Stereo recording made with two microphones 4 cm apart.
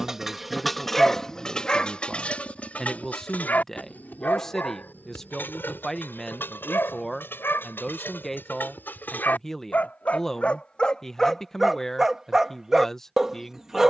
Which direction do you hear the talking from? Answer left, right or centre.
centre.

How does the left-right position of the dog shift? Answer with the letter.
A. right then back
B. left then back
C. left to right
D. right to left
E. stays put
B.